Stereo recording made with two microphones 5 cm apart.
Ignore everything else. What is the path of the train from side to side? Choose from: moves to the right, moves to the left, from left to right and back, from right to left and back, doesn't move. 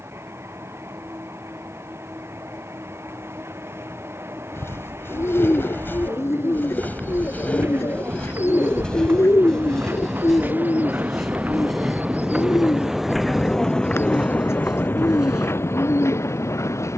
moves to the left.